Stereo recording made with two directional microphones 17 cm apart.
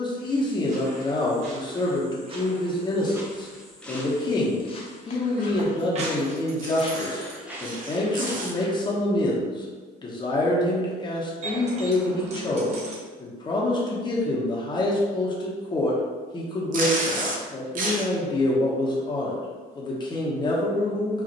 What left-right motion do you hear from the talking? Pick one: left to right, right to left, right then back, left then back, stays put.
stays put.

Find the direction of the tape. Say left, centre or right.
right.